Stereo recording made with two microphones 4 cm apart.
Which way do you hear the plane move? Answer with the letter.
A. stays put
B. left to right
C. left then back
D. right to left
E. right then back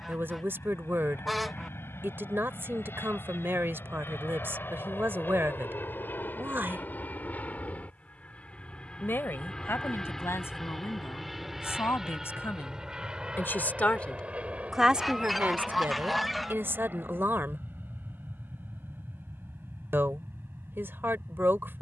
B.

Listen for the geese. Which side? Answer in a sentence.
In this clip you hear the geese in the centre.